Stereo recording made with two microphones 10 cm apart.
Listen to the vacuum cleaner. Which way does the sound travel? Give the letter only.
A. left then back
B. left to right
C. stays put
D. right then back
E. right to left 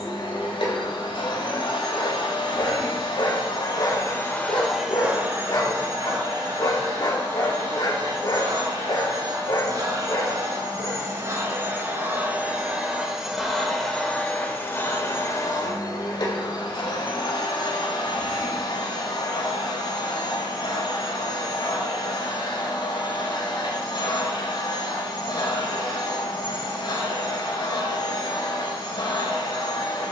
D.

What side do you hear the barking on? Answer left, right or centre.
left.